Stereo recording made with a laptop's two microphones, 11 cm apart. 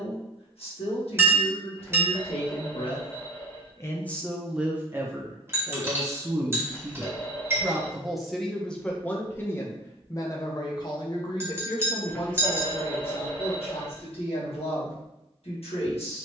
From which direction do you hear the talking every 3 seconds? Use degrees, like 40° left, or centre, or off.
70° left, 10° right, 10° right, 40° left, 70° left, 70° left.